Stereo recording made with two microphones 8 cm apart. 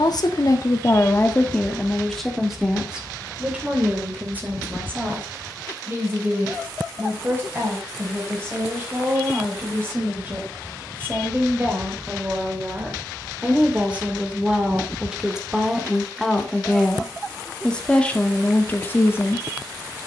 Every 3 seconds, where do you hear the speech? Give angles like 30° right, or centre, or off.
20° left, 20° right, 30° right, 20° right, 20° right, centre, 20° left.